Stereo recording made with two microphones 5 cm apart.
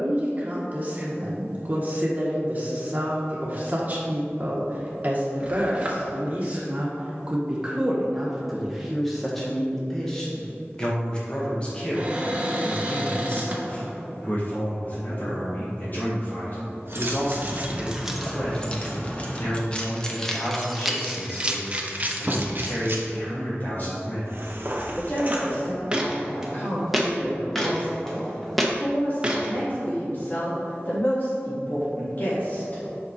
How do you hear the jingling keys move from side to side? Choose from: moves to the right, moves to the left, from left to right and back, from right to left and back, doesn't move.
from right to left and back.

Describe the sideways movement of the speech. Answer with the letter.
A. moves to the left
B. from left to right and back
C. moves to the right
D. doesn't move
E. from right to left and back
A.